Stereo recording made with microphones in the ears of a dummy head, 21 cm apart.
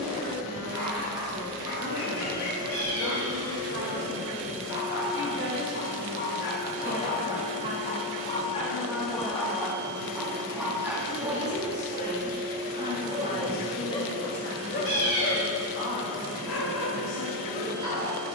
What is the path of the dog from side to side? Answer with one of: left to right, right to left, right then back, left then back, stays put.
right then back.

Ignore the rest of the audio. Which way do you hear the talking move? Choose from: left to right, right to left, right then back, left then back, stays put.
right to left.